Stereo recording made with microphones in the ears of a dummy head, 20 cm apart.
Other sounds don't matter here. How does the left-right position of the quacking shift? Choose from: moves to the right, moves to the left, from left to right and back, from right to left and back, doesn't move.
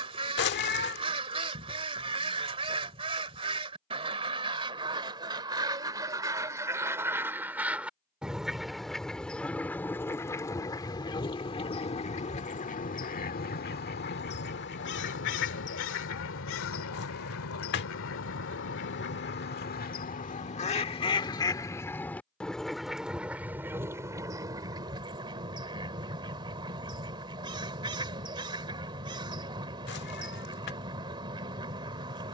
from right to left and back.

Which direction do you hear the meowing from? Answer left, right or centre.
left.